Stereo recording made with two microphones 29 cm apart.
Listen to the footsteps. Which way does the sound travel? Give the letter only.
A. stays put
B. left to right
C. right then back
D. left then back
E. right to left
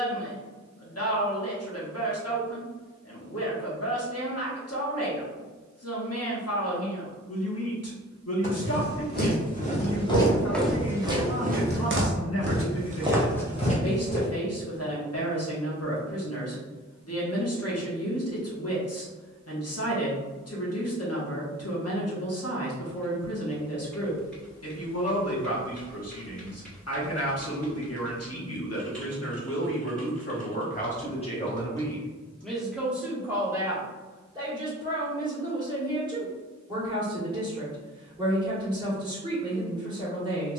C.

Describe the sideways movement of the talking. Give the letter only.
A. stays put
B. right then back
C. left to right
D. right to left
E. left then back
C.